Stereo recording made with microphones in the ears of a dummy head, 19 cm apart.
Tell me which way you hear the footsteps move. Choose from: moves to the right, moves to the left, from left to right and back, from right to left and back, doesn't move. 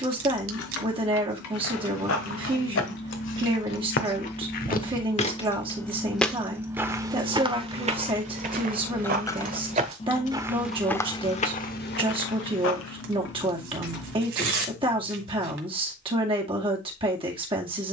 from left to right and back.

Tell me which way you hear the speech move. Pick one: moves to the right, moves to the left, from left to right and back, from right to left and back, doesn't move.
doesn't move.